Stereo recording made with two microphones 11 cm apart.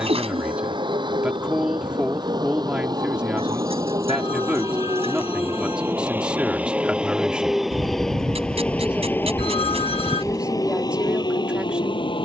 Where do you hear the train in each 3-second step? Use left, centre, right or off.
right, right, centre, left.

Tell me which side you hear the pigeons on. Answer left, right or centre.
right.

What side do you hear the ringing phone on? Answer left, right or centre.
left.